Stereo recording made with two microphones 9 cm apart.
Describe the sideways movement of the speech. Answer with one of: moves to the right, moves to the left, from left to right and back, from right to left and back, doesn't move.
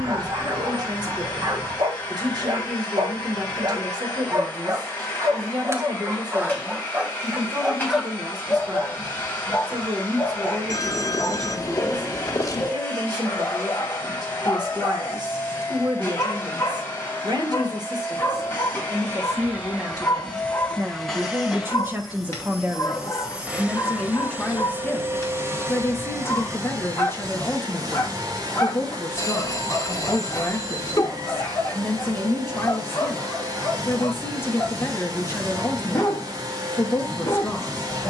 moves to the left.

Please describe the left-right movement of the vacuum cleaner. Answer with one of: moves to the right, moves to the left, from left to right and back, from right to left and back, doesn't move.
moves to the right.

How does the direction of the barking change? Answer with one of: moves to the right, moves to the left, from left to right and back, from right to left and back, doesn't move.
moves to the left.